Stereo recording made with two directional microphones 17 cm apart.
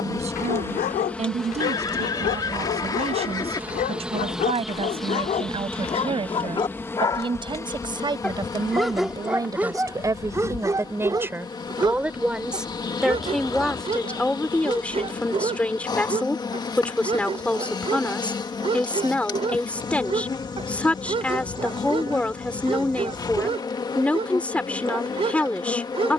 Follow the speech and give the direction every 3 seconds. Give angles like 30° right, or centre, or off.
40° right, 30° right, 30° right, 20° right, centre, 10° left, 10° left, 10° left, 10° left.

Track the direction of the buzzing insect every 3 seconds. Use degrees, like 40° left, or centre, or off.
centre, centre, 20° left, 20° left, 20° left, 20° left, 20° left, 20° left, 20° left.